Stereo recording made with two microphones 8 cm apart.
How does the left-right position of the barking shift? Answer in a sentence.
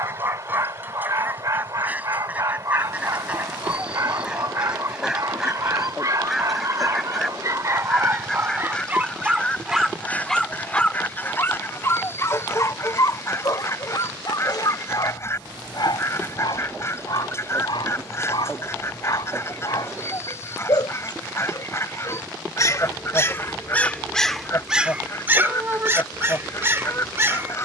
You can hear the barking move from right to left and back again.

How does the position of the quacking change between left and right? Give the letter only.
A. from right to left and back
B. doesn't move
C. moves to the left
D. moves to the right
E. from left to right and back
C.